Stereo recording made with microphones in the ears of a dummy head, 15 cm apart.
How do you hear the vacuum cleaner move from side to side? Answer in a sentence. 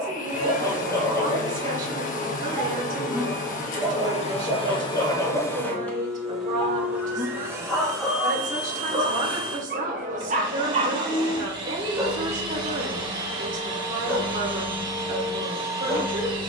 In this clip you hear the vacuum cleaner travel towards the right.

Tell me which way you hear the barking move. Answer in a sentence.
In this clip you hear the barking go right and come back.